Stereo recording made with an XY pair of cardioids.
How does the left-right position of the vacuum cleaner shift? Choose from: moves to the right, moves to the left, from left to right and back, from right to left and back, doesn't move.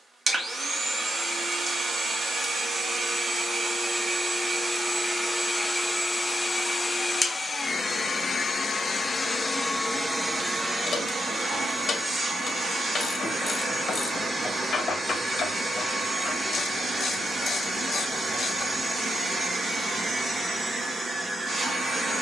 from right to left and back.